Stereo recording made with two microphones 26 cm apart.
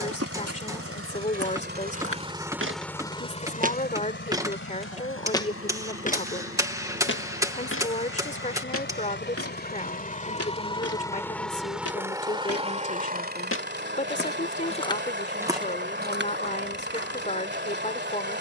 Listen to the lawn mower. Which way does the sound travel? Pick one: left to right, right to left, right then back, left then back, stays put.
left then back.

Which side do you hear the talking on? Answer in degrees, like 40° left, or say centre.
30° left.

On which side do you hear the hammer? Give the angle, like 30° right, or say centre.
10° right.